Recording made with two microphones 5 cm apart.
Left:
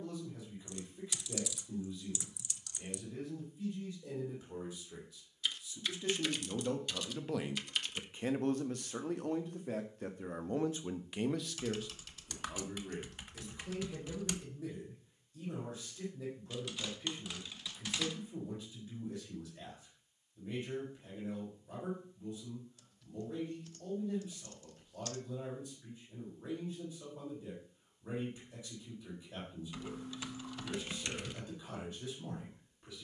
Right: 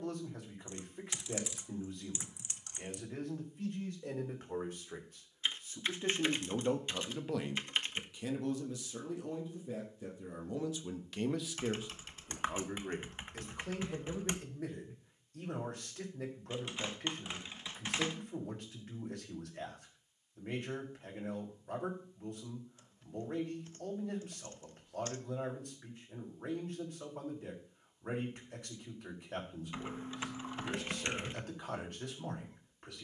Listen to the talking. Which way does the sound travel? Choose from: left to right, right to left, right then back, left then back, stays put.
left then back.